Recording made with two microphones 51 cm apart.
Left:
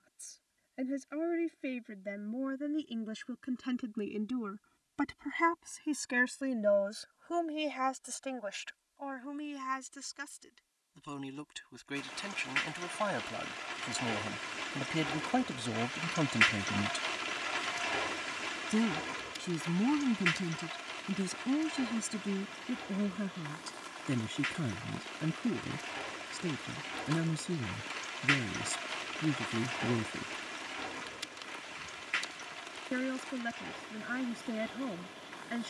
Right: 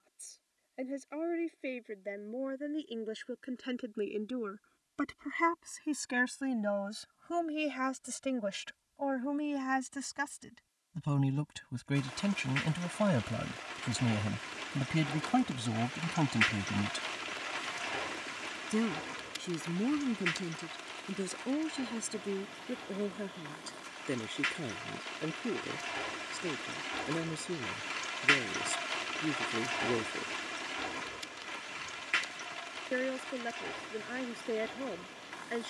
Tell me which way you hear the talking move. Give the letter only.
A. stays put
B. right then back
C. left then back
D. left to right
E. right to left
B.